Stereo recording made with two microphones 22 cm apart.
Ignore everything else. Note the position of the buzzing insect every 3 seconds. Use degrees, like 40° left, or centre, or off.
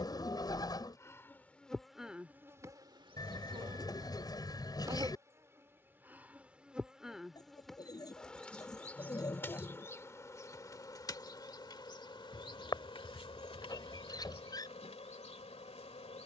centre, 20° right, centre, 10° left, 30° left, 30° left.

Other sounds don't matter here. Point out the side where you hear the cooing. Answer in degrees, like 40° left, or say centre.
20° left.